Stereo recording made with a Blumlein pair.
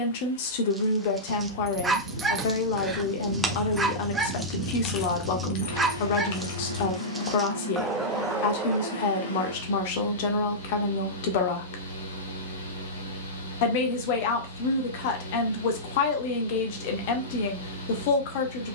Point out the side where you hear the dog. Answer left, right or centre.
centre.